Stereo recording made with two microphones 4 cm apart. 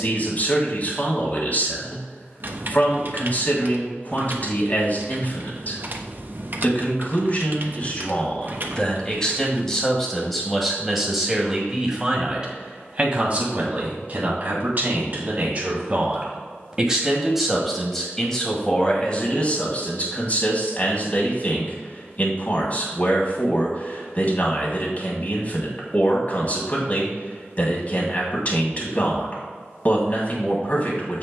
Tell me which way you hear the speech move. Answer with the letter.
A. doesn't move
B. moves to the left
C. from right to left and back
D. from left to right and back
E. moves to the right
D.